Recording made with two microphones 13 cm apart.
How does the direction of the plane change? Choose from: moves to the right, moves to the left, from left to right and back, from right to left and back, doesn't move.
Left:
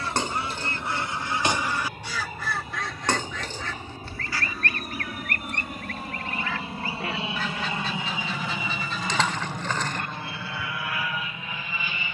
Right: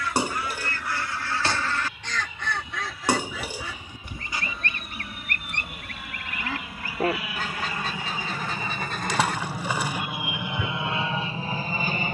moves to the right.